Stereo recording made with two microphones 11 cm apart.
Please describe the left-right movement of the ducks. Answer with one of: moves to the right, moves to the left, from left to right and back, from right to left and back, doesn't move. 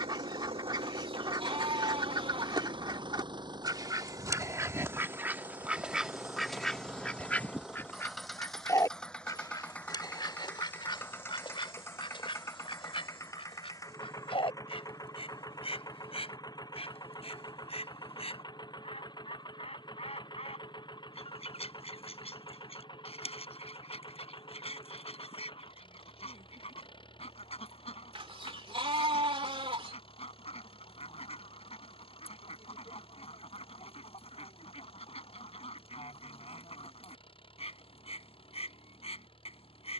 moves to the left.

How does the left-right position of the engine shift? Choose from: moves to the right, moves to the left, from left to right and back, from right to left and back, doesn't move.
moves to the left.